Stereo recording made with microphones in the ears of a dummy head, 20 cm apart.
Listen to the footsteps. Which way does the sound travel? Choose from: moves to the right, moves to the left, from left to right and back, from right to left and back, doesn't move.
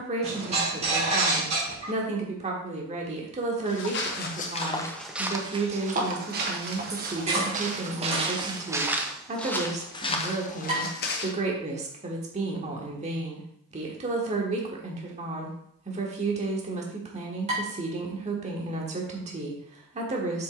from left to right and back.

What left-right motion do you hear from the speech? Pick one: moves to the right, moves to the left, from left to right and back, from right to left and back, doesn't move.
doesn't move.